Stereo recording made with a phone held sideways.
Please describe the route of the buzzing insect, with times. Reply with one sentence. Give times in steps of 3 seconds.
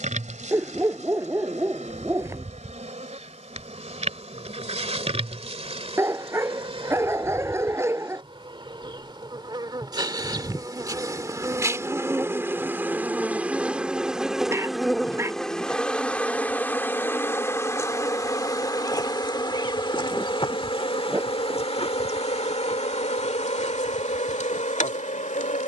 In this clip you hear the buzzing insect on the right from 0 s, in the centre from 12 s and on the left from 18 s.